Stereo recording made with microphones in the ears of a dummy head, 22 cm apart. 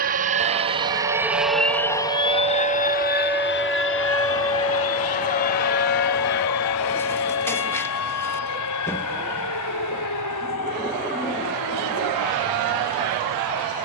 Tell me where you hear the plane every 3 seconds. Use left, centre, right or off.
centre, left, left, left, left.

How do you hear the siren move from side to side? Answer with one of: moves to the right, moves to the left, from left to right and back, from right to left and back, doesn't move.
moves to the left.